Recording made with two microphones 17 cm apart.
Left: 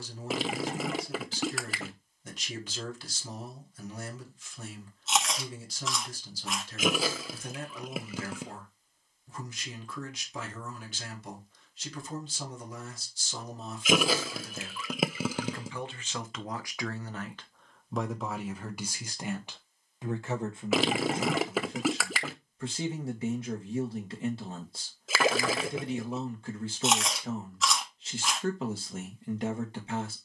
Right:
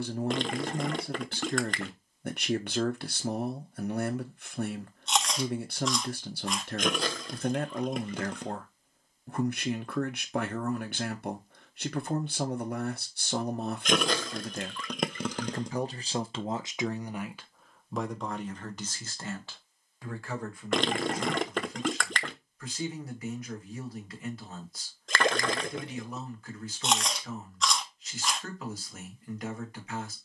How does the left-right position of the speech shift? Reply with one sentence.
You can hear the speech move to the left.